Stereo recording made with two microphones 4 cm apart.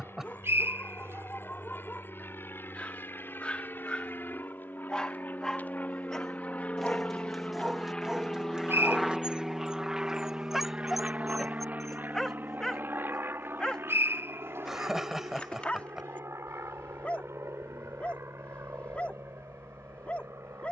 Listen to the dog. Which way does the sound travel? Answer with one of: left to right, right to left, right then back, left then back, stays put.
right then back.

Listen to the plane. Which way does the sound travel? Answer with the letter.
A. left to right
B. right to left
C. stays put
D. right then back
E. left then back
A.